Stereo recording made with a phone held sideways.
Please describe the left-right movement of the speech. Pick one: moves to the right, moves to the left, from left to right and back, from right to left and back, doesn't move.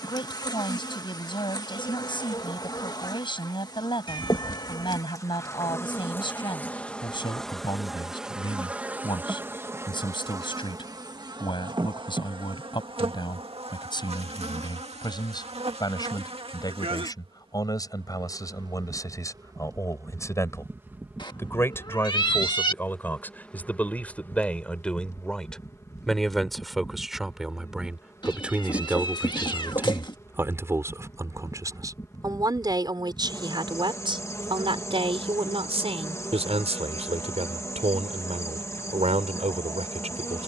moves to the right.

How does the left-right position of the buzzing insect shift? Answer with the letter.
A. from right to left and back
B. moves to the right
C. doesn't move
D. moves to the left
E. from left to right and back
E.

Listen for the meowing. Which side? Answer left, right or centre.
left.